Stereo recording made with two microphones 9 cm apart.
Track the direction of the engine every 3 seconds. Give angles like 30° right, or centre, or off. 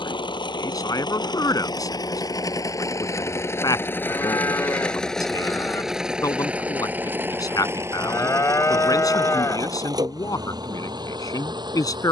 50° left, 10° left, 20° right, 50° right.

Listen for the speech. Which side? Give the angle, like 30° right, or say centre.
40° left.